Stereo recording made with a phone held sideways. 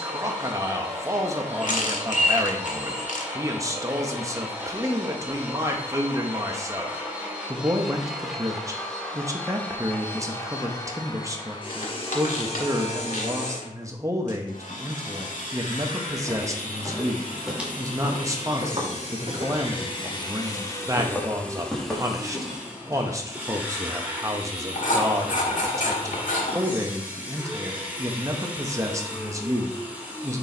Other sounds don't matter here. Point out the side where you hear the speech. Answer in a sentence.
You can hear the speech on the right.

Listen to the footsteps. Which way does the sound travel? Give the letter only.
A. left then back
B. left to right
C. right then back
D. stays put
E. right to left
C.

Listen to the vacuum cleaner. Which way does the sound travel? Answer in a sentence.
In this clip you hear the vacuum cleaner move from right to left and back again.